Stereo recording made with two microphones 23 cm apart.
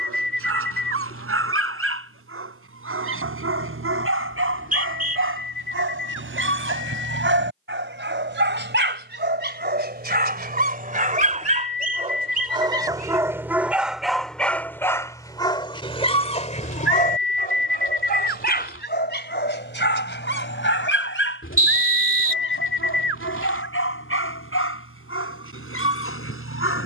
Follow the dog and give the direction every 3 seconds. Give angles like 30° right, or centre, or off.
70° right, 70° right, 60° right, 40° right, 10° right, 30° left, 50° left, 60° left, 70° left.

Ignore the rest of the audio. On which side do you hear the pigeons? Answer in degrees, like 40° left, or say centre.
60° left.